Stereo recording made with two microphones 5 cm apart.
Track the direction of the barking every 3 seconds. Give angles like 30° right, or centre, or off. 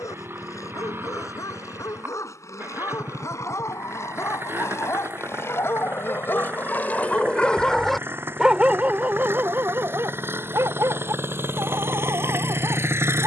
70° left, 60° left, 20° left, 50° right, 70° right.